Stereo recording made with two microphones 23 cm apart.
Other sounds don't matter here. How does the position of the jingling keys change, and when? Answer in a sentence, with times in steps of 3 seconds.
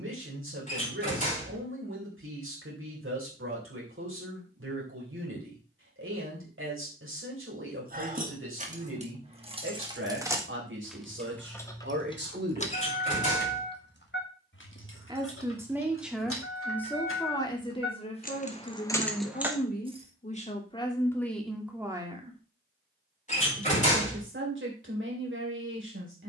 In this clip you hear the jingling keys not at all from 0 s, on the right from 6 s, in the centre from 9 s, on the left from 12 s, in the centre from 18 s and not at all from 21 s.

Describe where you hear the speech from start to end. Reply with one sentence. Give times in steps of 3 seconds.
In this clip you hear the speech on the right from 0 s, in the centre from 15 s, on the left from 18 s, in the centre from 21 s and on the right from 24 s.